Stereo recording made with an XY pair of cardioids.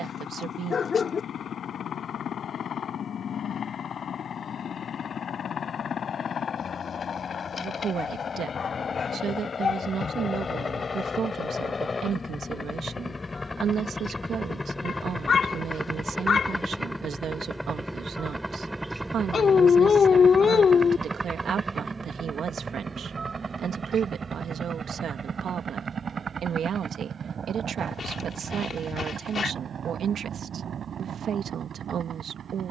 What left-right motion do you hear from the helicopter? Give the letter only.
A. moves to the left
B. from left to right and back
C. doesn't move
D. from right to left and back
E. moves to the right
E.